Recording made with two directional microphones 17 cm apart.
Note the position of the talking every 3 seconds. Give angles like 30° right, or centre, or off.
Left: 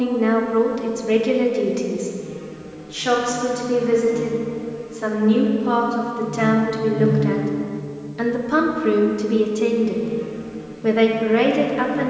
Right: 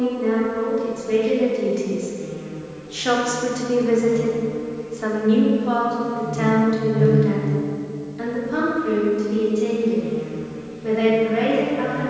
30° left, centre, 30° left, 50° left.